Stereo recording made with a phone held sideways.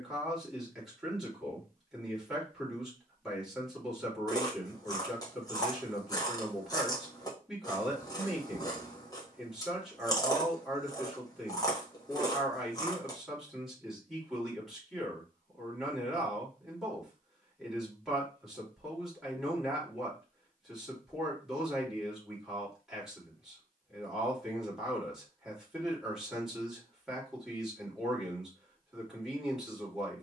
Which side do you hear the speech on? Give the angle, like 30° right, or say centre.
centre.